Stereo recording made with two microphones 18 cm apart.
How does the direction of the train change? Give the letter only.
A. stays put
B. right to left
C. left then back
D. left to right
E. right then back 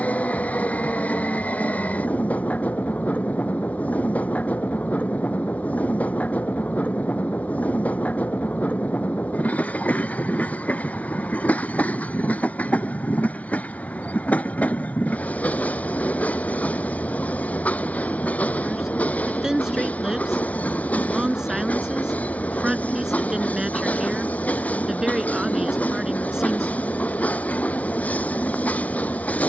A.